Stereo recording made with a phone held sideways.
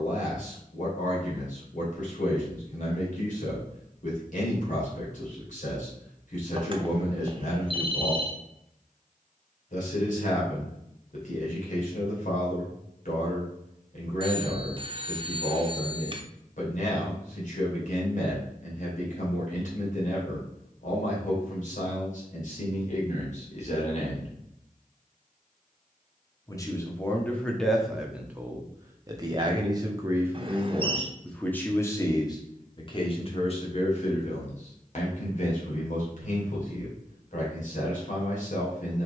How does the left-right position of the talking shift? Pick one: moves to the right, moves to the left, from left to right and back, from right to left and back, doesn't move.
from left to right and back.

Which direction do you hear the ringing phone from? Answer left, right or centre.
right.